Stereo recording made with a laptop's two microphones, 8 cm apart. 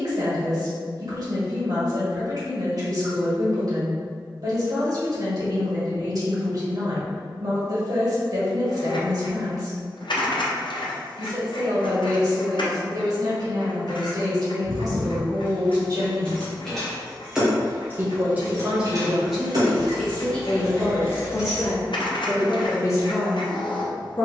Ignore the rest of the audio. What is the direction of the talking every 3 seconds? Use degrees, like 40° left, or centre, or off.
50° right, 50° right, 50° right, 50° right, 50° right, 50° right, centre, 40° left.